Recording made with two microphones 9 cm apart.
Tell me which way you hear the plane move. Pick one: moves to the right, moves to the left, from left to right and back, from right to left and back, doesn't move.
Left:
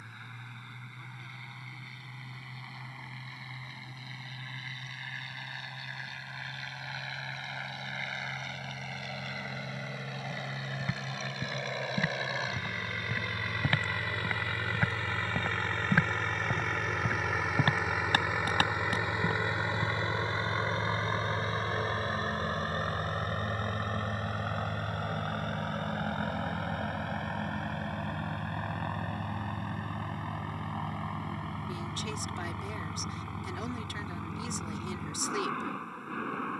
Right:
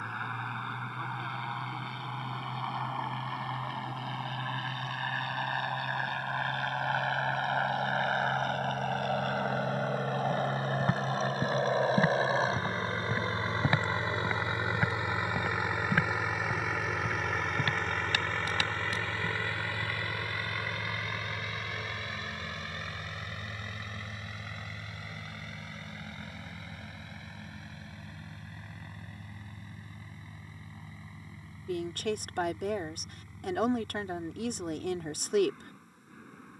moves to the left.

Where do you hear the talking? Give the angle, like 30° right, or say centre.
60° right.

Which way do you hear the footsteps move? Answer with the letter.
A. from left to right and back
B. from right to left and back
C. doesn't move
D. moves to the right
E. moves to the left
E.